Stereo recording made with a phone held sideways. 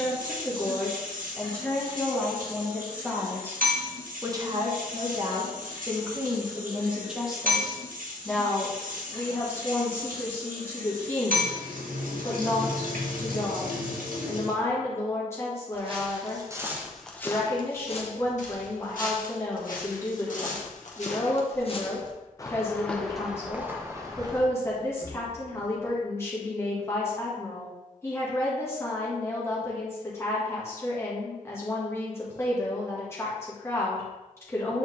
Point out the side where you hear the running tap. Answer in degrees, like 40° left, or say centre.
80° right.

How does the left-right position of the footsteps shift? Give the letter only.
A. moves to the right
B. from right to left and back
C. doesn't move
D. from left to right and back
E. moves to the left
B.